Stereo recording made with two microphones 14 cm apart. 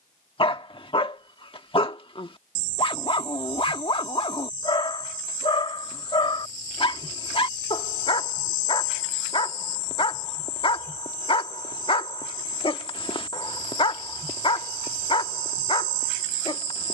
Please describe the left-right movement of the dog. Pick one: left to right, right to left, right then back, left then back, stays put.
stays put.